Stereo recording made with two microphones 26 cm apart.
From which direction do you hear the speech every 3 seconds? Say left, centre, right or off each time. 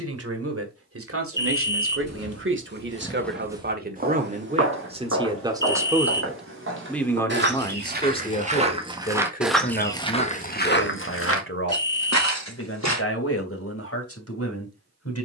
right, right, centre, left, left.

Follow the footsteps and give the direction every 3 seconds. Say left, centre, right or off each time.
left, right, right, left, left.